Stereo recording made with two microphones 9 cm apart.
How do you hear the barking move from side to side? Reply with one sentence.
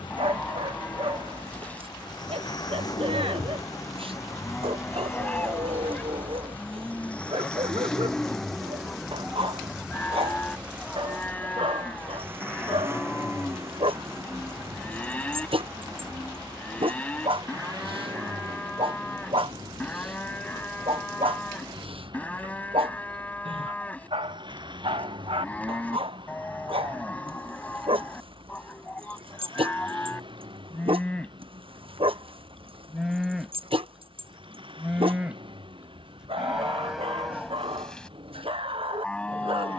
You can hear the barking stay in one place.